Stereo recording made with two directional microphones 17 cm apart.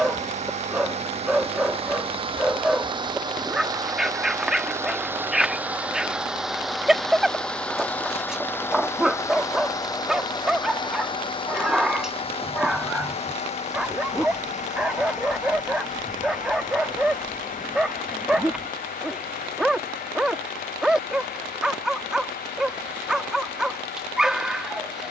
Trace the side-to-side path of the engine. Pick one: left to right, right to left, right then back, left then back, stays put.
right to left.